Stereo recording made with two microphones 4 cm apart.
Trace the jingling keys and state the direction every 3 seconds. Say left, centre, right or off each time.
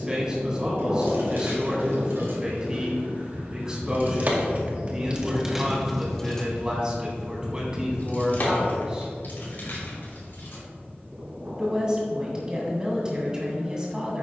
right, right, left, left, off.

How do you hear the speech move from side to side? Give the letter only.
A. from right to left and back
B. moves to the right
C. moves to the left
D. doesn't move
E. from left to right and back
D.